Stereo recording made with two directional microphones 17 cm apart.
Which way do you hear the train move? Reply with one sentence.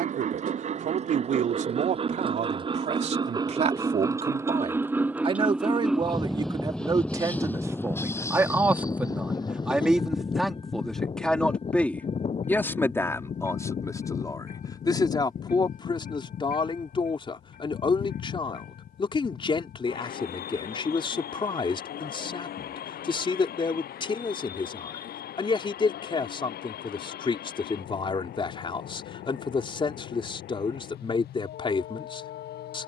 You can hear the train travel towards the left.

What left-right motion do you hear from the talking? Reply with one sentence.
In this clip you hear the talking travel towards the left.